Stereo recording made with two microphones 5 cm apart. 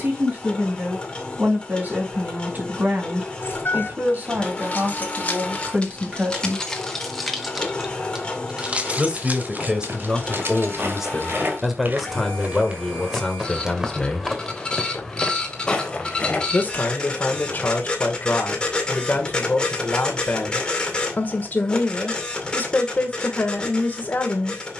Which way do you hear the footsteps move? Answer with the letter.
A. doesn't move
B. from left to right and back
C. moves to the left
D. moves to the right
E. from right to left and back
C.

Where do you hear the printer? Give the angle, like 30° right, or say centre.
20° left.